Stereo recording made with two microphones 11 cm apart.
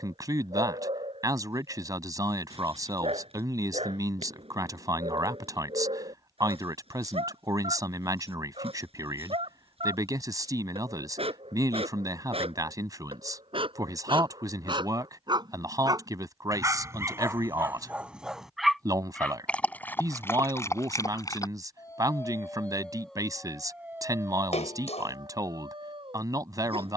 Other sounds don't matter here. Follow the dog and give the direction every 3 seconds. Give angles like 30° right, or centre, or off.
60° right, 60° right, 60° right, 60° right, 50° right, 30° right, 10° left, 10° left, 40° right.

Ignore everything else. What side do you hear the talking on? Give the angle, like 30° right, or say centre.
30° right.